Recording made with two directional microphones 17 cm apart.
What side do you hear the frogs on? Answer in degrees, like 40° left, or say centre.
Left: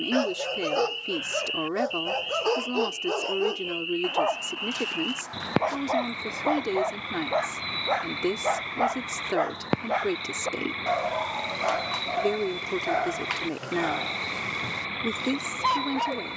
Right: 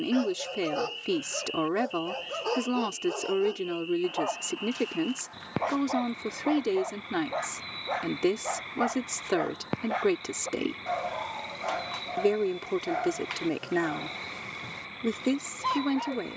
60° left.